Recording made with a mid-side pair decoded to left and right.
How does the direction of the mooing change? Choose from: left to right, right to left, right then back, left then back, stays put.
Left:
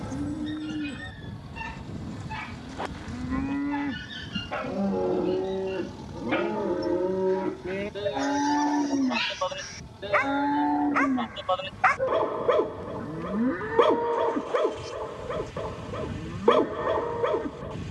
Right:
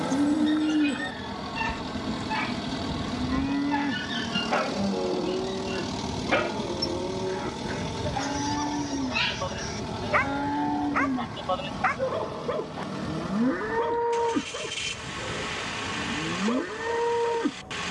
left then back.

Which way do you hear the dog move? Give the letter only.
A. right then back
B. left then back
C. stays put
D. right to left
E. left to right
D.